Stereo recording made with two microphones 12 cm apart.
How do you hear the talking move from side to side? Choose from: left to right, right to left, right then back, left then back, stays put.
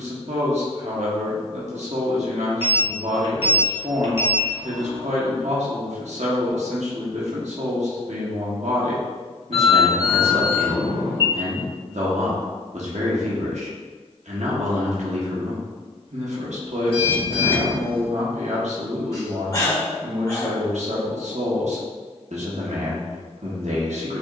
stays put.